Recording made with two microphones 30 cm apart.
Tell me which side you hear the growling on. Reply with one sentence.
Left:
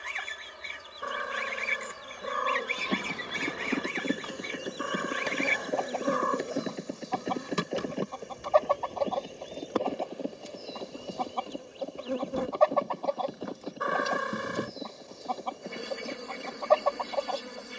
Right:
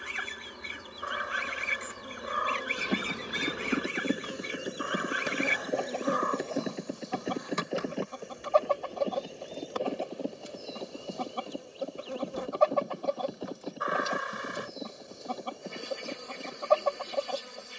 You can hear the growling on the left.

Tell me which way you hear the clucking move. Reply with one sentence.
In this clip you hear the clucking stay in one place.